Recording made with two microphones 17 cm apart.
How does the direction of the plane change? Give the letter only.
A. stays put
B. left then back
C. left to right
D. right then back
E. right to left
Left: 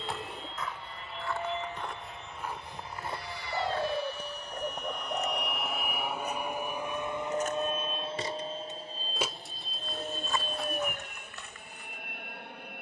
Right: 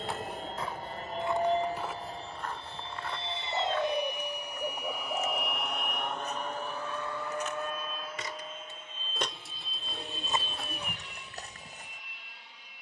E.